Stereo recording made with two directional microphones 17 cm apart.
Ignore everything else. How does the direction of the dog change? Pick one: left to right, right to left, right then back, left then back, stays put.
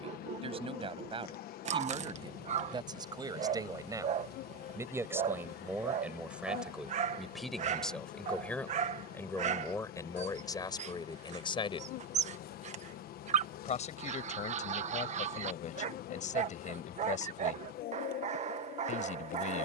stays put.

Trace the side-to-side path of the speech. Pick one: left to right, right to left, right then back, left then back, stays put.
right to left.